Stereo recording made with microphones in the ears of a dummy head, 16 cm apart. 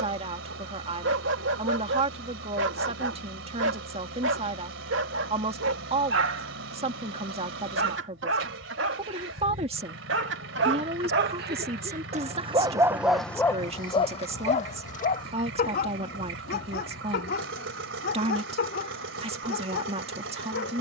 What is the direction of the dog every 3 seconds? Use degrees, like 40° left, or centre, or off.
80° right, 80° right, 80° right, 70° right, 10° left, 60° left, 70° left.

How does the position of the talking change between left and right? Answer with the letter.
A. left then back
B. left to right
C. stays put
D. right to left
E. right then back
C.